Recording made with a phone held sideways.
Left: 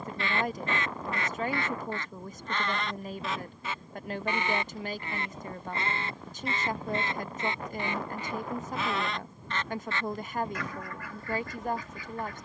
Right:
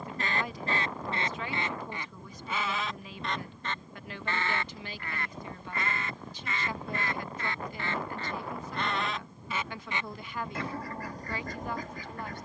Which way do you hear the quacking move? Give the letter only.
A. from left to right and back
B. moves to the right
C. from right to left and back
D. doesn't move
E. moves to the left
C.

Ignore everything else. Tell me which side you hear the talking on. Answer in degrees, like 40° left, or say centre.
50° left.